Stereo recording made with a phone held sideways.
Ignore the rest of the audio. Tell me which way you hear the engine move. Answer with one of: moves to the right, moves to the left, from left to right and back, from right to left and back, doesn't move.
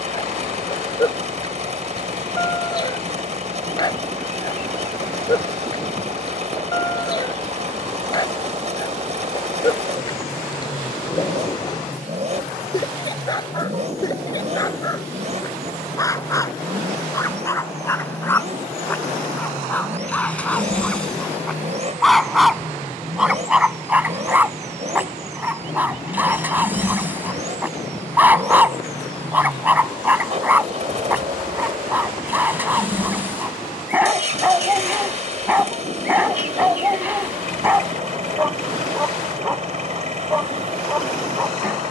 doesn't move.